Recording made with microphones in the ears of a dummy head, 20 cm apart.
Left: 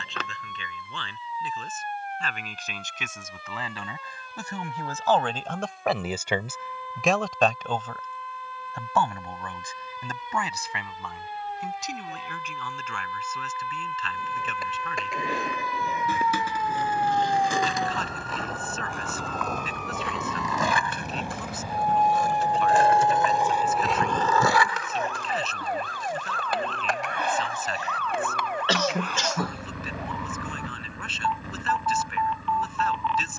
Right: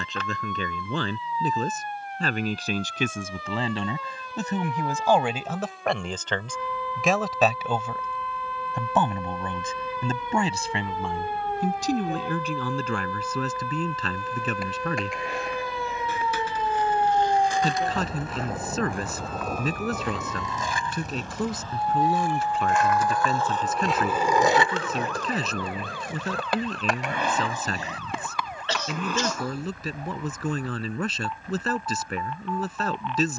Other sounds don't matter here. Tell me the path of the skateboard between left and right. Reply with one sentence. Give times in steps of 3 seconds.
In this clip you hear the skateboard not at all from 0 s, on the left from 12 s, on the right from 24 s and not at all from 30 s.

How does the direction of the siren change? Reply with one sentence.
In this clip you hear the siren go from the right side to the left.